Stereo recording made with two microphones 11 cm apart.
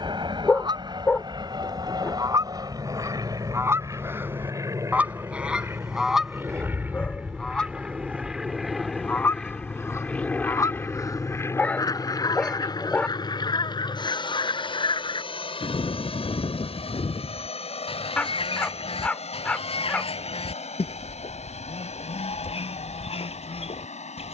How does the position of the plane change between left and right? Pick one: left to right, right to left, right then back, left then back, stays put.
right to left.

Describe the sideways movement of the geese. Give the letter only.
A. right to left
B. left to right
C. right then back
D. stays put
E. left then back
A.